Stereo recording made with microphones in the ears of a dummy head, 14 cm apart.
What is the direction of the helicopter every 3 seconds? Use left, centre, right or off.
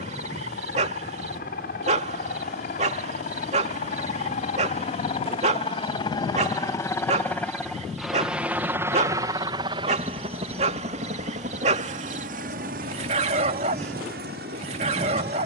left, left, centre, right, right.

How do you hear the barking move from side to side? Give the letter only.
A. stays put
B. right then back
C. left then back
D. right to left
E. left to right
A.